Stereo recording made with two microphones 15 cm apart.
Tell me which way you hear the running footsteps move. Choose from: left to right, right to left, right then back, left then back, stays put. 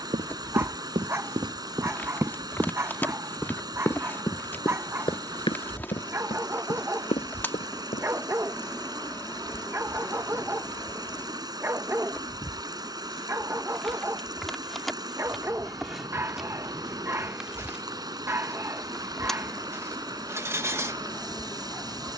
right to left.